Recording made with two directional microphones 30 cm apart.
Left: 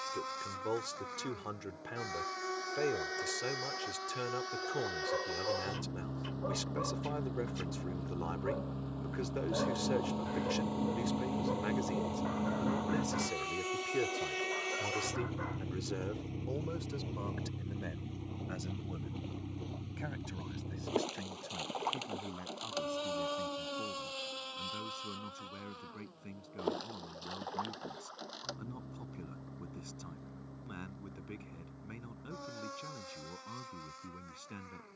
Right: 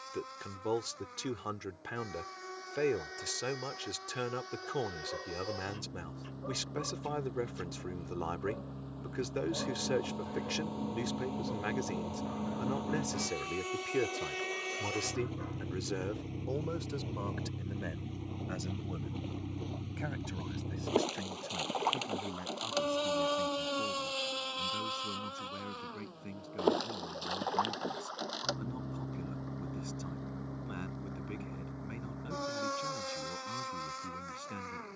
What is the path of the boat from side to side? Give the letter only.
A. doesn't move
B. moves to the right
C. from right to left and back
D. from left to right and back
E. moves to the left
B.